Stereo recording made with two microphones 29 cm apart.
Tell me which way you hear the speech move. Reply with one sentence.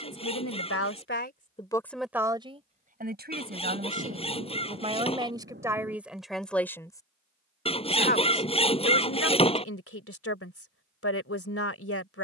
You can hear the speech move from left to right and back again.